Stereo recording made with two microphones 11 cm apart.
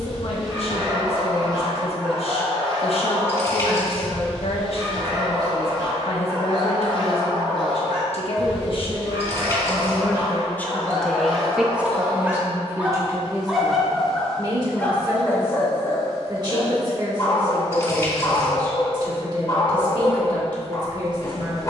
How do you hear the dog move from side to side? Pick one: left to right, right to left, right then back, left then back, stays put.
right to left.